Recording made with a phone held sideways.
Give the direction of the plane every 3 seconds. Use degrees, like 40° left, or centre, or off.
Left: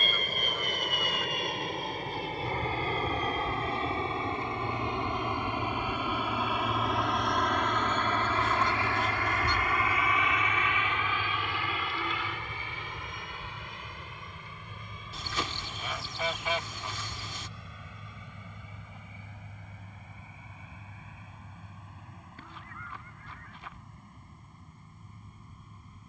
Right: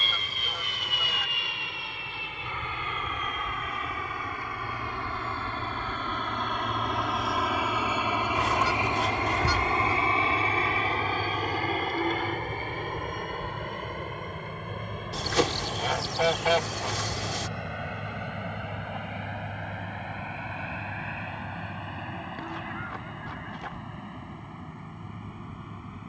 40° left, 20° left, centre, 30° right, 50° right, 60° right, 70° right, 70° right, 70° right.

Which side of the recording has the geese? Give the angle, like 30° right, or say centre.
80° right.